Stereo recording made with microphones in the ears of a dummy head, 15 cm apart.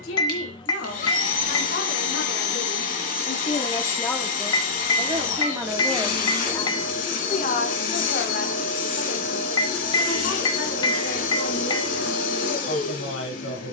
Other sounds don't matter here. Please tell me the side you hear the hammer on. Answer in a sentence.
You can hear the hammer on the left.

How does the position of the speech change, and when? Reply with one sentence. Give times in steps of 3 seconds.
You can hear the speech on the left from 0 s, in the centre from 3 s and on the left from 6 s.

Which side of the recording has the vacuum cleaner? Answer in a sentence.
You can hear the vacuum cleaner on the left.